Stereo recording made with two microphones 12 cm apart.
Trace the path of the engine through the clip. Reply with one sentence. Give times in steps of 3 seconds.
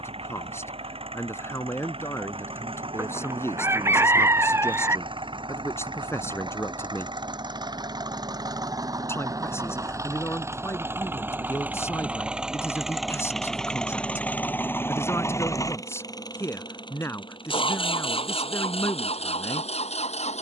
You can hear the engine on the right from 0 s, in the centre from 12 s and on the left from 15 s.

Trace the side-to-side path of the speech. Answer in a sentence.
You can hear the speech stay put.